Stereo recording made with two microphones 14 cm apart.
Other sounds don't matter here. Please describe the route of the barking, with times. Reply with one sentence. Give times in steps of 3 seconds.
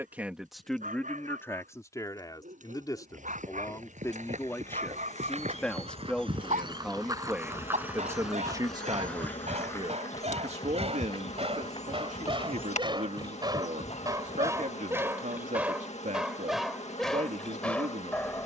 In this clip you hear the barking on the right from 0 s and in the centre from 15 s.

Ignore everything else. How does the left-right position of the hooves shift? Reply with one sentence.
In this clip you hear the hooves move to the left.